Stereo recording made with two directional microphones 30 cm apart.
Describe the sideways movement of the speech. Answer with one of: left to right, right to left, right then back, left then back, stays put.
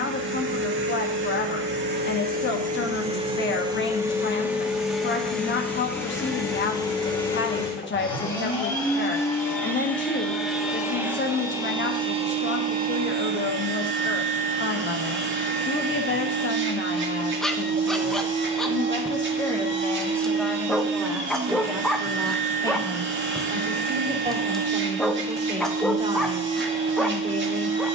left to right.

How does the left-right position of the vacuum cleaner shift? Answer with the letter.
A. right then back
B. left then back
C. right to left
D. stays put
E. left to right
B.